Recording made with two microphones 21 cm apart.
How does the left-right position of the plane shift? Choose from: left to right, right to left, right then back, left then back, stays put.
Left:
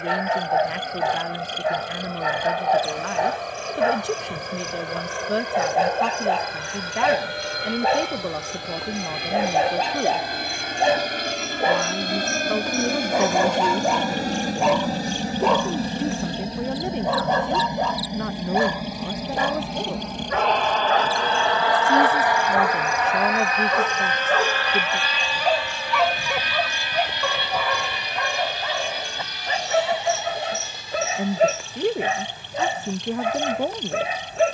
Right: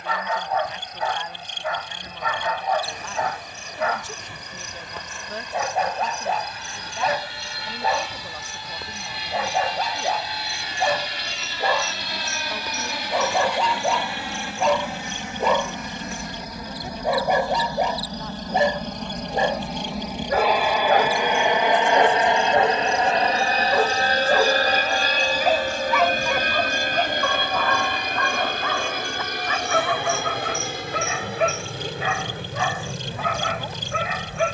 left to right.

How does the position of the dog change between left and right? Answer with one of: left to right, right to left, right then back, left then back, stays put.
right then back.